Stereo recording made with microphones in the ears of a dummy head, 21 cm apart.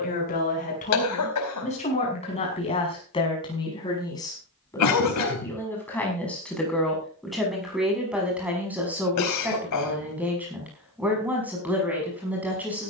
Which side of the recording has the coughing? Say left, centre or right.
left.